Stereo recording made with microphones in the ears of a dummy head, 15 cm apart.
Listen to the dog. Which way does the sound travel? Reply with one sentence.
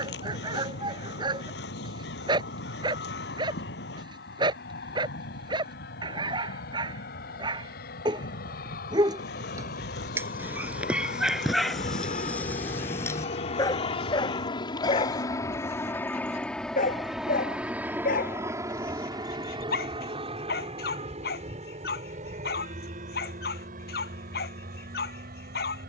You can hear the dog move to the left.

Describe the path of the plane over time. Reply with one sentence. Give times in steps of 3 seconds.
You can hear the plane on the left from 0 s, in the centre from 15 s and on the right from 18 s.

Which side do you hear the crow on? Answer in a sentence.
In this clip you hear the crow on the left.